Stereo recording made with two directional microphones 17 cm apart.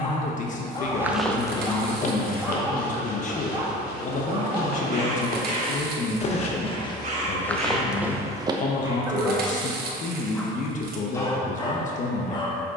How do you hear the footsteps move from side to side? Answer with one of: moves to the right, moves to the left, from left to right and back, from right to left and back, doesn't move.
from right to left and back.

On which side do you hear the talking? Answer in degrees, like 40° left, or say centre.
50° left.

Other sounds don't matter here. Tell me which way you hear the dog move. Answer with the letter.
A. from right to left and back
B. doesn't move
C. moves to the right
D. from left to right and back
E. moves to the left
D.